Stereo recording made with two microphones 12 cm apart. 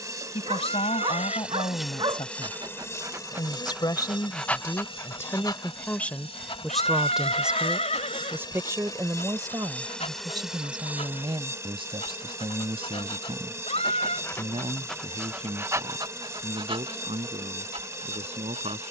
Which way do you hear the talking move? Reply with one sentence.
In this clip you hear the talking move to the right.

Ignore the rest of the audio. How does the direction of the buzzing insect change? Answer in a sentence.
In this clip you hear the buzzing insect go left and come back.